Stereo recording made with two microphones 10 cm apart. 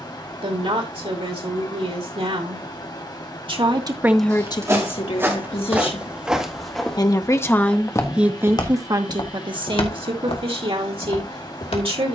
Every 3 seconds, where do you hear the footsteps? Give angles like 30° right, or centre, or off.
off, 20° right, 10° left, 70° left.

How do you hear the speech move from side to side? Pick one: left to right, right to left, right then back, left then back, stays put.
left then back.